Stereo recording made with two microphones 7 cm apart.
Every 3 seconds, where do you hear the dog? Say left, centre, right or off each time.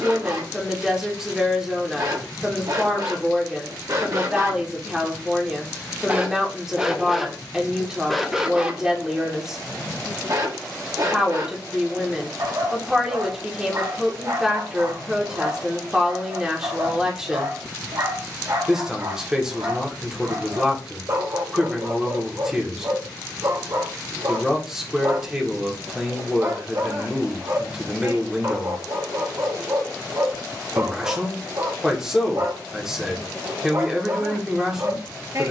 right, right, centre, right, right, right, right, right, right, right, right, right.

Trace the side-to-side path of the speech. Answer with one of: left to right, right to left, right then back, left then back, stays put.
stays put.